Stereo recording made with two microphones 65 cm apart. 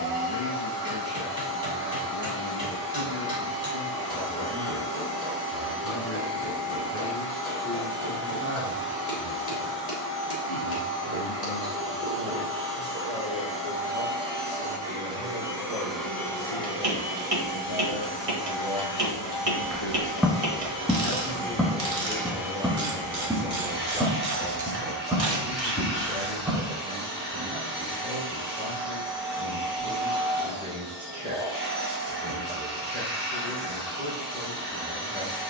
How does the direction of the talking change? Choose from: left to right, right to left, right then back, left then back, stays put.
left then back.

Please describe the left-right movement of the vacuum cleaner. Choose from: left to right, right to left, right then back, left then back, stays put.
left then back.